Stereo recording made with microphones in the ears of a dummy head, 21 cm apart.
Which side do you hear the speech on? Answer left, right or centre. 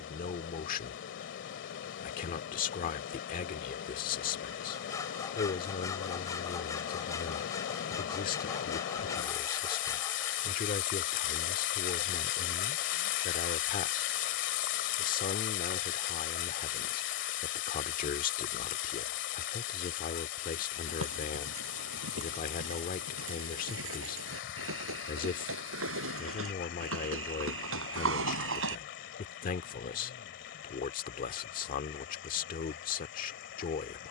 left.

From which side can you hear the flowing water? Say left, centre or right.
left.